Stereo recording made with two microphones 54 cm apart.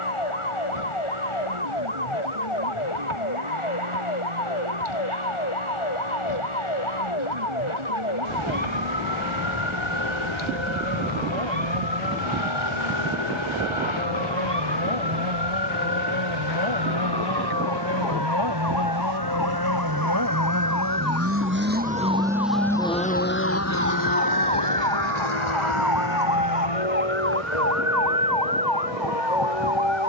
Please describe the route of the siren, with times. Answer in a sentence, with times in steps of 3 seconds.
In this clip you hear the siren on the left from 0 s, in the centre from 24 s and on the right from 27 s.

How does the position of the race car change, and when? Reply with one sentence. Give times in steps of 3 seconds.
You can hear the race car on the right from 0 s, in the centre from 21 s and on the left from 24 s.